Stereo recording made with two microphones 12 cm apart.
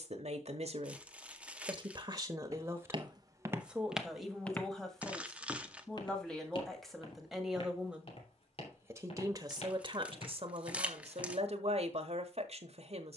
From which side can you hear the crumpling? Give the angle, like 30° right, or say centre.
10° right.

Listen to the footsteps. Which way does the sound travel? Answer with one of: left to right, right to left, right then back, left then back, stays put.
right to left.